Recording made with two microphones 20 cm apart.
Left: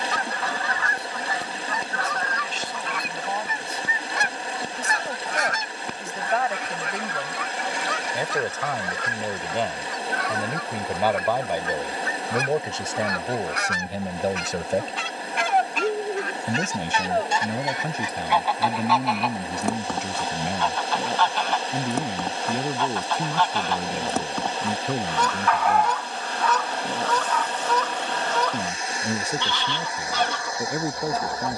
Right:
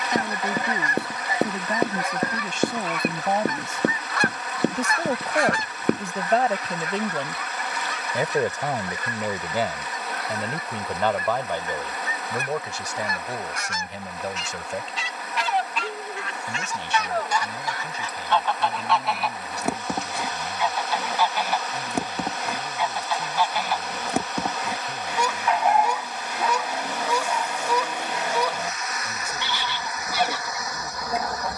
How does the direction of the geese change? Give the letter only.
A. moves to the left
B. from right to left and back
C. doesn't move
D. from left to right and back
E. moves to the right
B.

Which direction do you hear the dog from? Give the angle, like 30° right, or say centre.
20° right.